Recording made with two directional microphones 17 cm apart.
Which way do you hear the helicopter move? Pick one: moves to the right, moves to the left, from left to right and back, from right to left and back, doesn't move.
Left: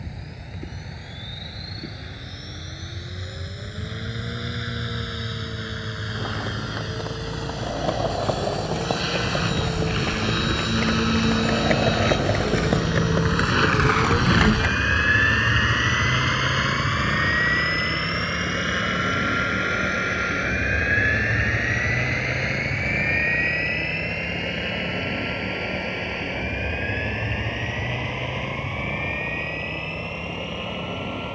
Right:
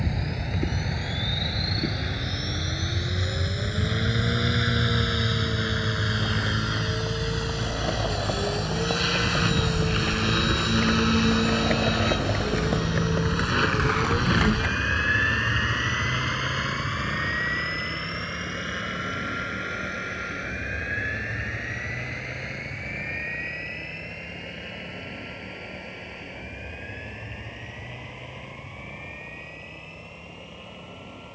moves to the left.